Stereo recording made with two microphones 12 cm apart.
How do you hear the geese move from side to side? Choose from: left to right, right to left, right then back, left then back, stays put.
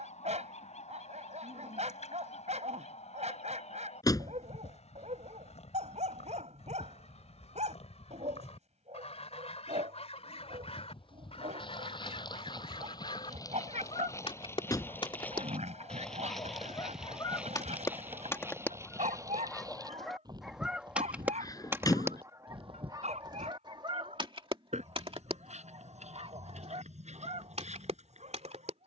left to right.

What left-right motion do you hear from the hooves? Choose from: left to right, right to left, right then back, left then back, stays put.
left to right.